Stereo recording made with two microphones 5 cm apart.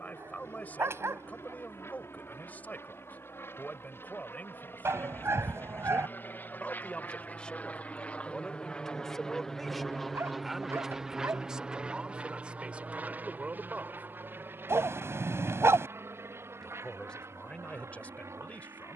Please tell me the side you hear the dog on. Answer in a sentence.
You can hear the dog on the right.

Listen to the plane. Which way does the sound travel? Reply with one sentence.
In this clip you hear the plane travel towards the right.